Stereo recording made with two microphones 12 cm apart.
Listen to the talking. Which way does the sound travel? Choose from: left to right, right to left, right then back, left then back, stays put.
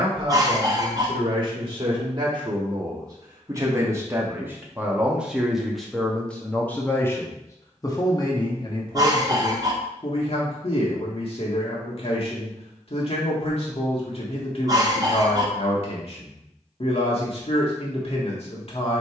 right to left.